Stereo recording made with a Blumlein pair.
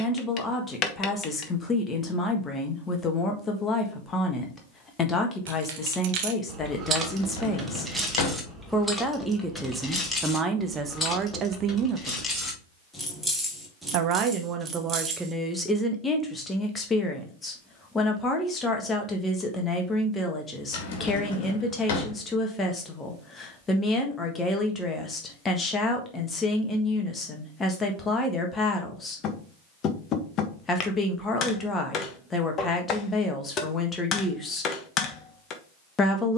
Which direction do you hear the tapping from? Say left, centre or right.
left.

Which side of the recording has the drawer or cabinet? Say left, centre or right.
left.